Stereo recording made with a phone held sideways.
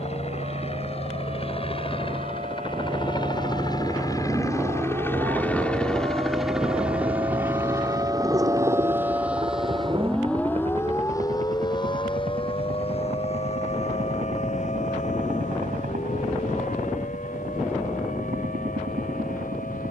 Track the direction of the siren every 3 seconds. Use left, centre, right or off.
right, right, right, centre, left, left, left.